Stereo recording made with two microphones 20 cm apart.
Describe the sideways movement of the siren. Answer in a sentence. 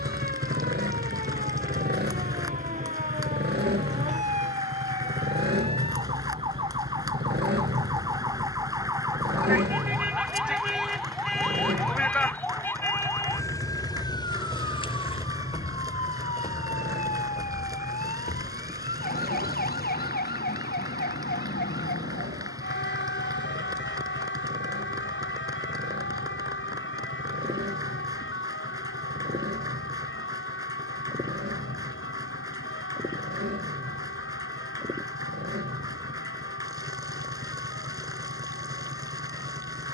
In this clip you hear the siren go from the right side to the left.